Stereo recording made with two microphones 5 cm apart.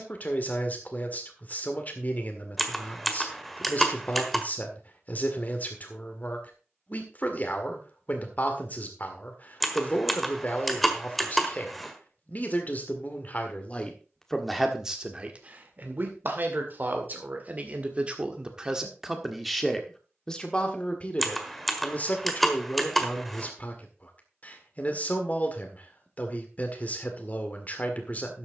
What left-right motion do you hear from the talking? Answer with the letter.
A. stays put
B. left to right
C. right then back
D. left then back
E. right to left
C.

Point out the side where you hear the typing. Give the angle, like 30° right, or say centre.
centre.